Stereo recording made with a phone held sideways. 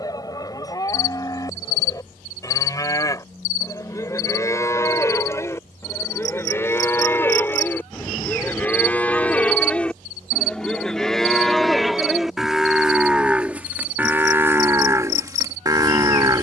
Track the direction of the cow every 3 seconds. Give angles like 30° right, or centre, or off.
20° left, 20° left, 10° left, centre, 10° right, 20° right.